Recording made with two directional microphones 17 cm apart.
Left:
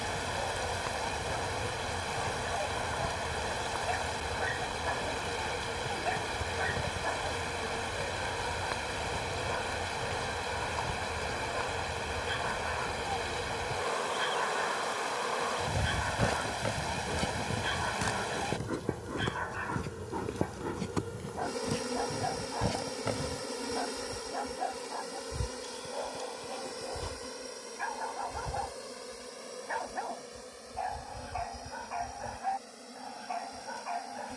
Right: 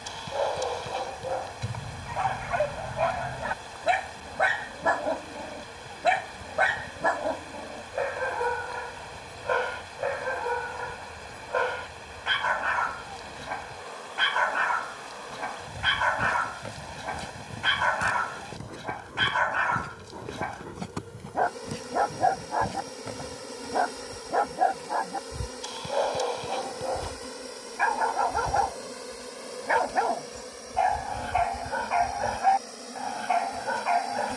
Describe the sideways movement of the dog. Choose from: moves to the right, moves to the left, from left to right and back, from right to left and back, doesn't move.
doesn't move.